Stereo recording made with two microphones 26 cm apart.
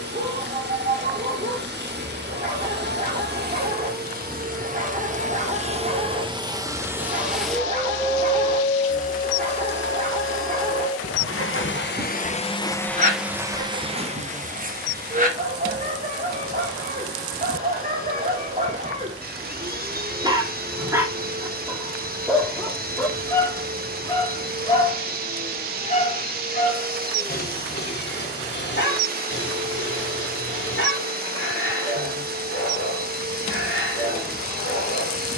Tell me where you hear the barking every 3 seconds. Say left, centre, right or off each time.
right, right, right, right, right, right, right, centre, left, left, left, left.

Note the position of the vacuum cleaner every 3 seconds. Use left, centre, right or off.
right, right, centre, left, centre, right, right, right, right, right, right, right.